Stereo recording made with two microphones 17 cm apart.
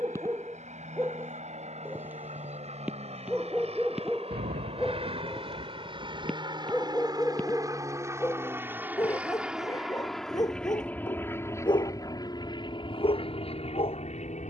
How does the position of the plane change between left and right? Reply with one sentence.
You can hear the plane move from right to left.